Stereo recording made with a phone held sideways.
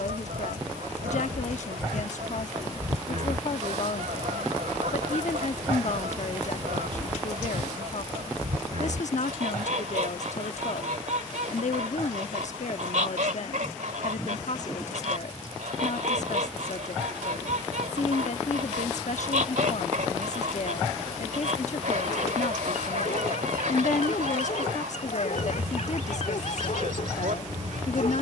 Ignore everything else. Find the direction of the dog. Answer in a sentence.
You can hear the dog on the left.